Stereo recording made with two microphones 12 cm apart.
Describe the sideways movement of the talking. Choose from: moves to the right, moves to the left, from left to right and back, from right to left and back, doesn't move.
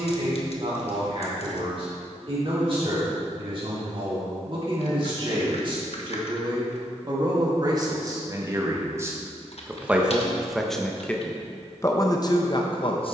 moves to the left.